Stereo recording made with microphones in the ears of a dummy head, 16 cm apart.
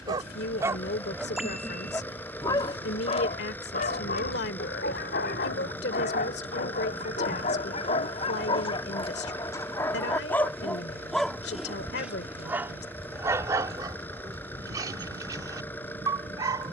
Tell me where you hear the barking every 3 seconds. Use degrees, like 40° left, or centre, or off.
centre, 50° left, 40° left, 10° left, 20° right, 20° right.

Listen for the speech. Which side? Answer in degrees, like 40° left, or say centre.
60° left.